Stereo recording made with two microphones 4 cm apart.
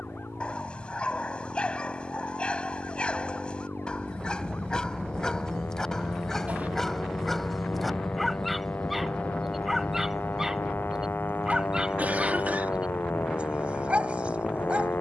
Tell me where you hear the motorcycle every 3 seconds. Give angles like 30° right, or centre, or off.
70° right, 50° right, 10° right, 40° left, 50° left.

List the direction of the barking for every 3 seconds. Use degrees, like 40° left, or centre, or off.
30° left, 20° left, centre, 10° right, 30° right.